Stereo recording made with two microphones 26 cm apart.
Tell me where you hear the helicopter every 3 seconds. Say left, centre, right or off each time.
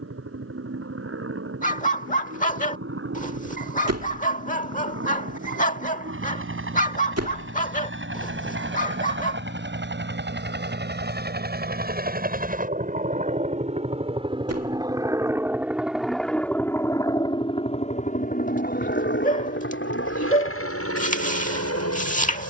right, right, right, right, right, centre, left, left.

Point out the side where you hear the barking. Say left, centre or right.
left.